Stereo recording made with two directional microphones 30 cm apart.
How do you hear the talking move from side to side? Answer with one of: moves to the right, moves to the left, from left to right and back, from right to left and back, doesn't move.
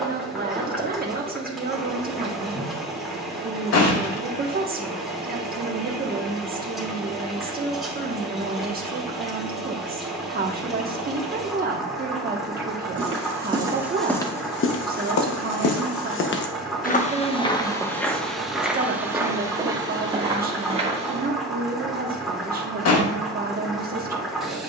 doesn't move.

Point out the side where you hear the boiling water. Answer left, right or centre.
centre.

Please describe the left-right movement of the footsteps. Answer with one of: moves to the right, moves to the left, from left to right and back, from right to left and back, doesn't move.
from right to left and back.